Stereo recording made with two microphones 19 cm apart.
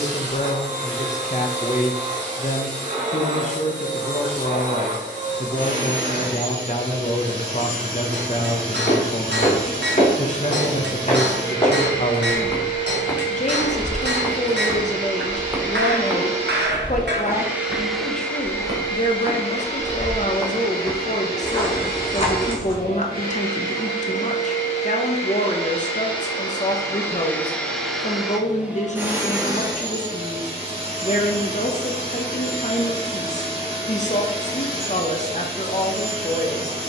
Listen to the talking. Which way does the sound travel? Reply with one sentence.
In this clip you hear the talking stay in one place.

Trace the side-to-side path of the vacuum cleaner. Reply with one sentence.
You can hear the vacuum cleaner move from right to left and back again.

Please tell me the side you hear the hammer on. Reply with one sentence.
You can hear the hammer on the right.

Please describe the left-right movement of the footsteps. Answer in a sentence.
You can hear the footsteps go right and come back.